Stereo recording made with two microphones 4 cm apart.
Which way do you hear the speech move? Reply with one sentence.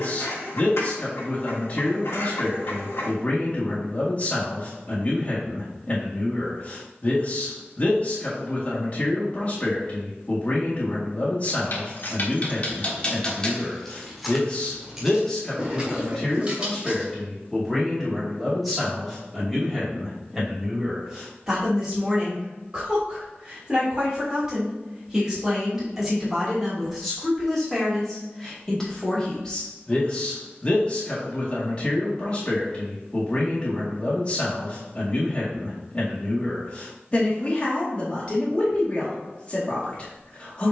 You can hear the speech go right and come back.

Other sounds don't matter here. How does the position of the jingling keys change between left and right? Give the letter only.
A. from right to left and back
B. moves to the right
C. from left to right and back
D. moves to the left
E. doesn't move
B.